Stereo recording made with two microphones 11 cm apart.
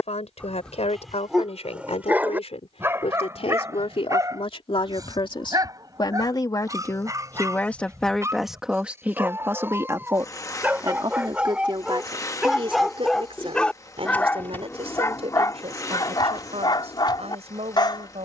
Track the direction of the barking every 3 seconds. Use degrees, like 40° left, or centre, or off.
10° right, 30° right, 30° right, 20° right, 10° left, 40° left.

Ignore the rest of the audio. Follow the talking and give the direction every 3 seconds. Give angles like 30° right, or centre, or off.
70° left, 60° left, 20° left, 30° right, 60° right, 70° right.